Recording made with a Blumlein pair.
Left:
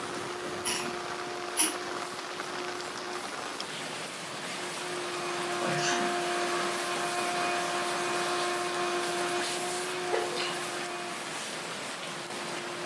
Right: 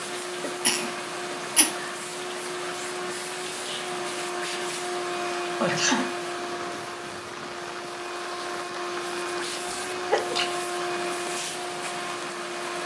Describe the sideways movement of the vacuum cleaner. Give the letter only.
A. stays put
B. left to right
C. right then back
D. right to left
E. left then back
E.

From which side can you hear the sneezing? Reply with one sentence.
You can hear the sneezing on the right.